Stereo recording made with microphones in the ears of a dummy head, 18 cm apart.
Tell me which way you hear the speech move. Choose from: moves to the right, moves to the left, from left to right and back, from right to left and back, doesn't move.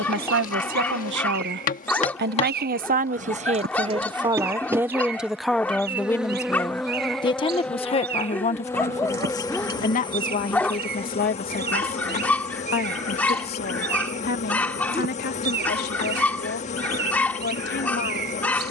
moves to the left.